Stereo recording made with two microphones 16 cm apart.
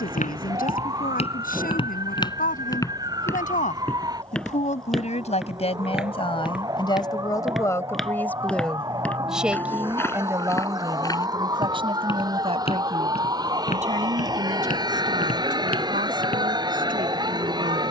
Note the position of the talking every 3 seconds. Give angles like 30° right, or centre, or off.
60° left, 50° left, 20° left, 20° right, 50° right, 60° right.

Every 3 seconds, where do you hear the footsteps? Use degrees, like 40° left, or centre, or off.
40° left, centre, centre, 20° left, 40° left, 70° left.